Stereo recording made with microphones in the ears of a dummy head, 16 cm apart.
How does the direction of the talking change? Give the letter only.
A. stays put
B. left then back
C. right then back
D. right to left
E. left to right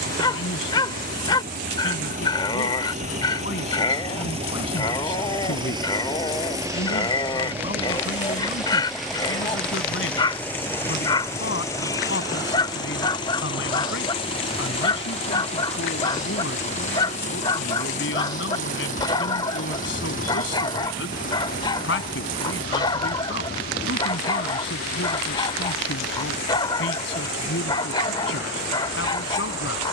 A.